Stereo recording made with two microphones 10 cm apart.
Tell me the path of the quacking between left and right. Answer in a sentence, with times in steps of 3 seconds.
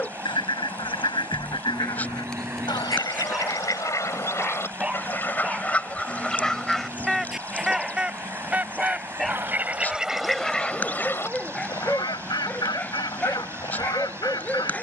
You can hear the quacking on the left from 0 s, in the centre from 6 s and on the left from 12 s.